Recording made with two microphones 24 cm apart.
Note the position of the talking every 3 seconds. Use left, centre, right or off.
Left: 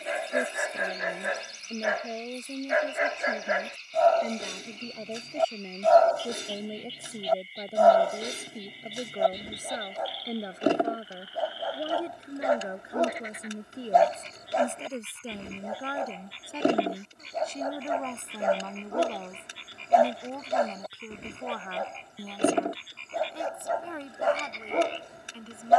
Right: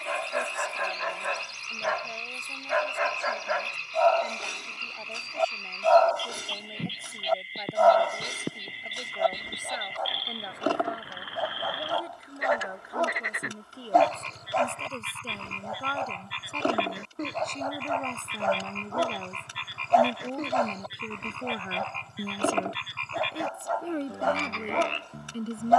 left, left, left, left, left, centre, centre, right, right.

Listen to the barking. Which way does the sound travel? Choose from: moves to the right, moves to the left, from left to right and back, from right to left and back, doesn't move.
doesn't move.